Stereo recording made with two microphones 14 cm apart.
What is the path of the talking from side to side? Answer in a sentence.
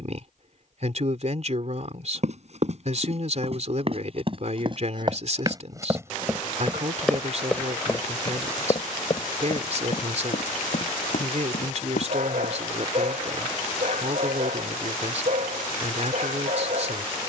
You can hear the talking stay in one place.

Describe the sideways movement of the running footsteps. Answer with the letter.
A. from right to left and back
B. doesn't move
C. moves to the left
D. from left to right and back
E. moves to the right
C.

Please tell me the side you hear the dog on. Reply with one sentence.
You can hear the dog on the right.